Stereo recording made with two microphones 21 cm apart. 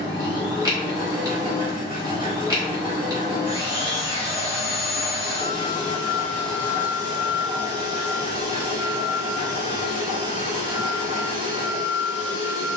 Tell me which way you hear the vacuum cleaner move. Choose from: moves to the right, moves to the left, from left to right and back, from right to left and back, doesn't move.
doesn't move.